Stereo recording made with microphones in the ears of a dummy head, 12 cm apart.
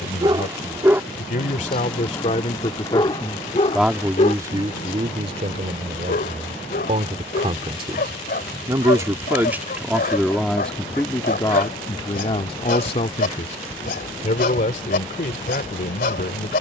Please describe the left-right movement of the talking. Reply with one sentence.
You can hear the talking move from left to right and back again.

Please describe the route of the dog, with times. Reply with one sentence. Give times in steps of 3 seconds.
In this clip you hear the dog in the centre from 0 s and on the left from 3 s.